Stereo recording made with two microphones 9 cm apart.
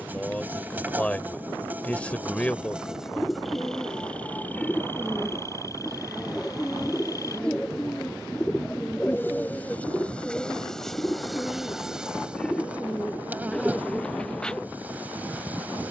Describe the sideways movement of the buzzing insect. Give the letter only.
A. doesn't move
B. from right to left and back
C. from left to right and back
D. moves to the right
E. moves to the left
B.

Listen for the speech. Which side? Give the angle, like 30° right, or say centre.
10° left.